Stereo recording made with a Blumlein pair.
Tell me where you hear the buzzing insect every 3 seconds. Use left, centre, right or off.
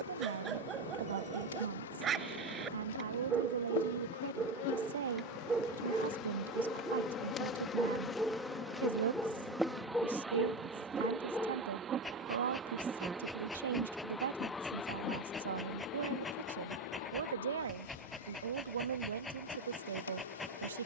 left, left, left, centre, centre, left, left.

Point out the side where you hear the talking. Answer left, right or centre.
right.